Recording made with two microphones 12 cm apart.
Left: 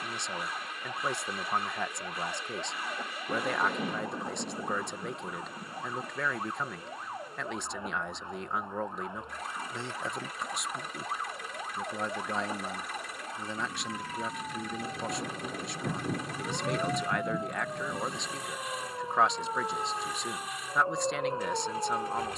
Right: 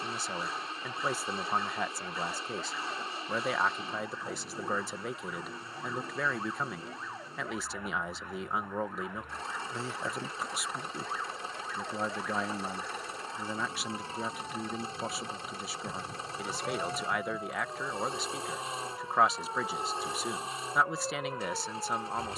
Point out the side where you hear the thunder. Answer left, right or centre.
left.